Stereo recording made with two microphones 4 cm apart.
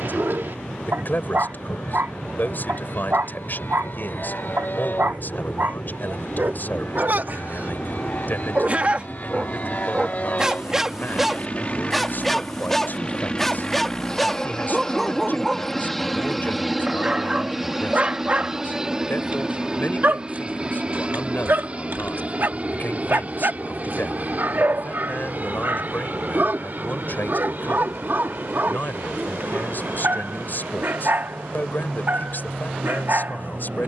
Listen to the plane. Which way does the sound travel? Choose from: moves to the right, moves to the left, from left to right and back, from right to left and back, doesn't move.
moves to the right.